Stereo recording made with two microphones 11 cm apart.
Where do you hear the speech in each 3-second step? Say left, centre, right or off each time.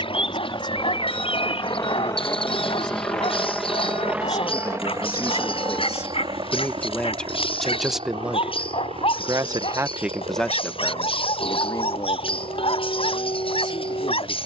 left, left, centre, centre, left.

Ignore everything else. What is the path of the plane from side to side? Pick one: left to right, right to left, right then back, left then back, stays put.
left to right.